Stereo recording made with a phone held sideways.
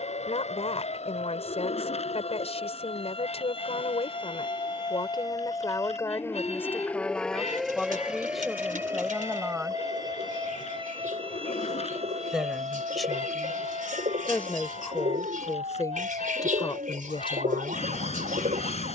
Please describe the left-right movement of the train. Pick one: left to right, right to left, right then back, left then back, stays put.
stays put.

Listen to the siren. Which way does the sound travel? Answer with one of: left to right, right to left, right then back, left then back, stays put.
left to right.